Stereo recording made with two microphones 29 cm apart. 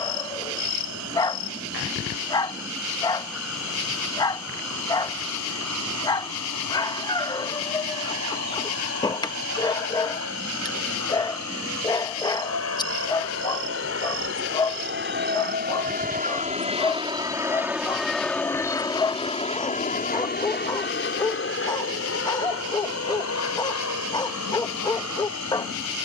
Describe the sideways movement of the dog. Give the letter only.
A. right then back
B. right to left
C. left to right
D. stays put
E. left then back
D.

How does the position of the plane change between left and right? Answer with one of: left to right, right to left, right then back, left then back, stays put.
right to left.